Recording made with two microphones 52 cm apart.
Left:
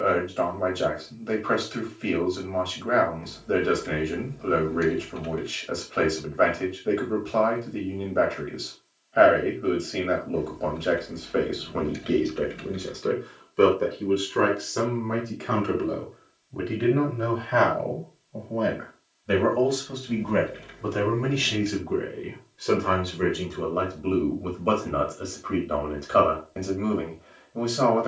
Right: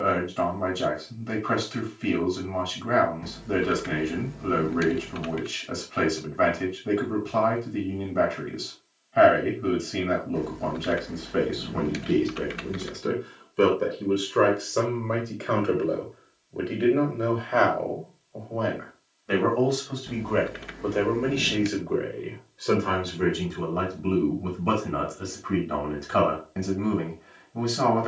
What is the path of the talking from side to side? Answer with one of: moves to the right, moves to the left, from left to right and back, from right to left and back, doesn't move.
from right to left and back.